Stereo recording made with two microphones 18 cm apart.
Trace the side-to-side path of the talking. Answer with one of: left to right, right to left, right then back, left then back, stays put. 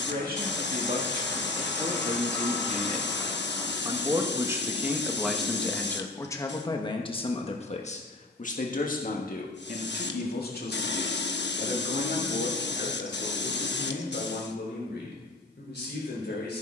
right to left.